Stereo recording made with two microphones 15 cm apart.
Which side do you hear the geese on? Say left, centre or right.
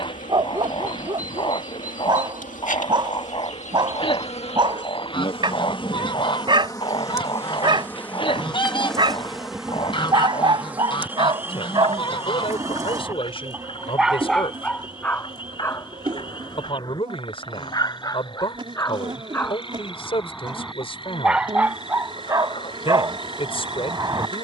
left.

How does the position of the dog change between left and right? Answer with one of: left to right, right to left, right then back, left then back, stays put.
left then back.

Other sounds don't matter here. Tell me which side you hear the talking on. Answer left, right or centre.
left.